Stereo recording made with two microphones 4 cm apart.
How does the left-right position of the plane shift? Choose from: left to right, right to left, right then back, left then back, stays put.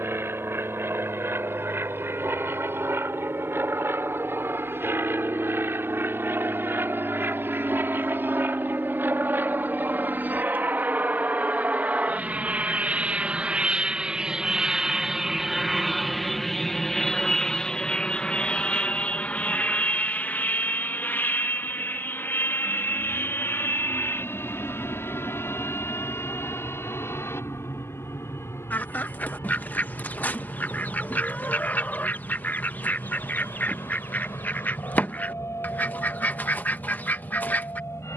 right to left.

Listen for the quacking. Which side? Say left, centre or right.
left.